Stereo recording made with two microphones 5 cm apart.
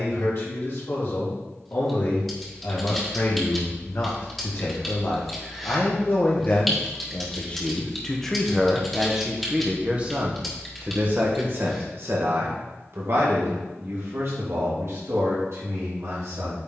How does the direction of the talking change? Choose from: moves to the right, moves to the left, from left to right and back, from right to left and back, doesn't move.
moves to the right.